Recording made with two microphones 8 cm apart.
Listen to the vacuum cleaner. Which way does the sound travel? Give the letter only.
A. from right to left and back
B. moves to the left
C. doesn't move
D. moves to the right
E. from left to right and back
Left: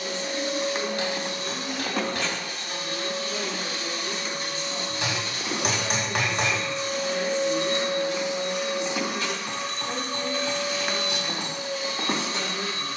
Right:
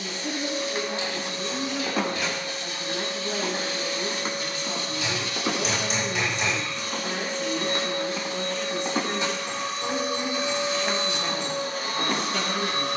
D.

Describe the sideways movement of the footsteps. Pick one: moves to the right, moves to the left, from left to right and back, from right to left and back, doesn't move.
from left to right and back.